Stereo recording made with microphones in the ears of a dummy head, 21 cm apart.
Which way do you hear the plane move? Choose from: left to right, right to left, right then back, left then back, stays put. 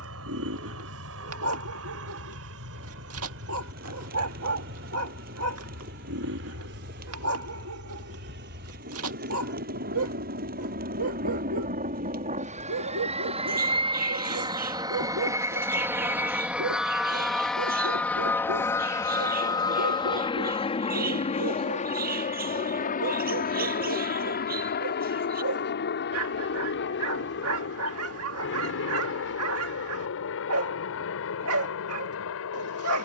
right to left.